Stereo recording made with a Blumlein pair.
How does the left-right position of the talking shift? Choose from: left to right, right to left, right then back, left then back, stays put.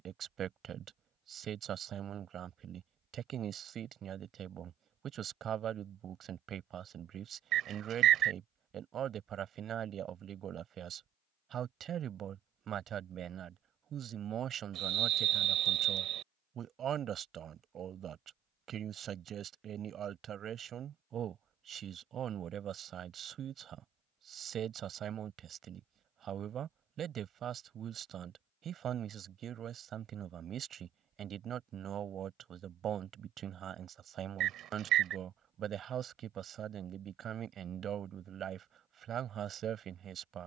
stays put.